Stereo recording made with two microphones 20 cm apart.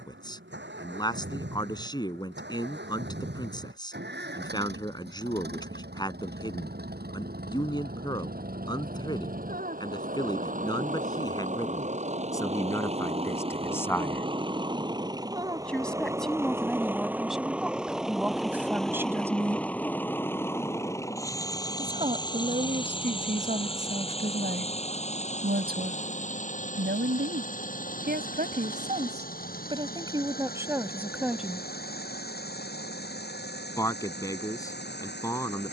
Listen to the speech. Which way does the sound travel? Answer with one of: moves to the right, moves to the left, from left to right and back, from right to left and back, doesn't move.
from left to right and back.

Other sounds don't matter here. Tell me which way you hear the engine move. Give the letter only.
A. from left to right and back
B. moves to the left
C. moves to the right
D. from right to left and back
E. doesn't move
B.